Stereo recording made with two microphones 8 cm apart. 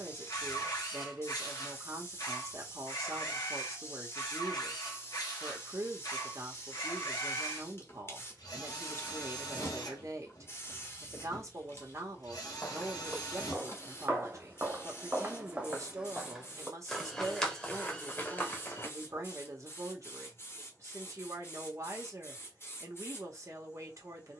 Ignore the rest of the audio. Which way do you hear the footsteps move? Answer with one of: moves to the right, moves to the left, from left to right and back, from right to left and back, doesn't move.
from left to right and back.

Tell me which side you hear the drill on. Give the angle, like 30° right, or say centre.
50° left.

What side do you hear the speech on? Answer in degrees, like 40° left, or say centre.
40° right.